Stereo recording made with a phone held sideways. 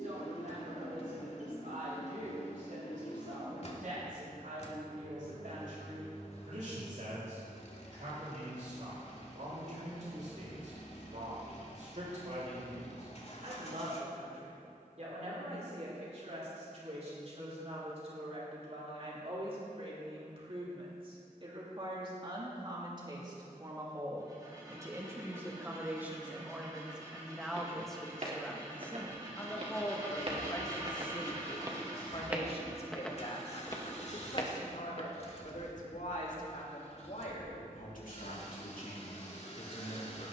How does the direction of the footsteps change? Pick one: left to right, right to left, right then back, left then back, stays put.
right to left.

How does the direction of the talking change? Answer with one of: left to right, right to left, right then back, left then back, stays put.
right to left.